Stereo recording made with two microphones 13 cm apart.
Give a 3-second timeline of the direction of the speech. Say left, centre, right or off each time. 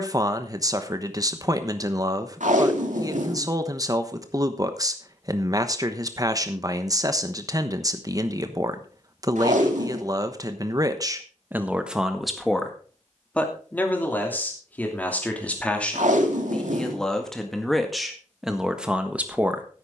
right, right, right, right, centre, centre, centre.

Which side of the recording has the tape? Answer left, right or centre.
right.